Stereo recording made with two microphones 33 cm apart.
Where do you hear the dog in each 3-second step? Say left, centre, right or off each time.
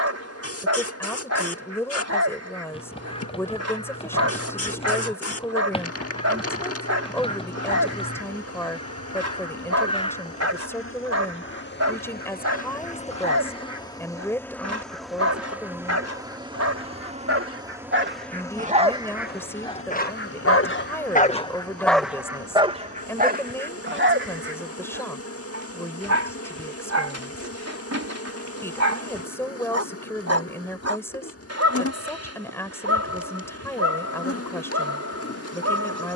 right, right, right, right, right, right, centre, centre, right, right, right, right.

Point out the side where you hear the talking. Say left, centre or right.
centre.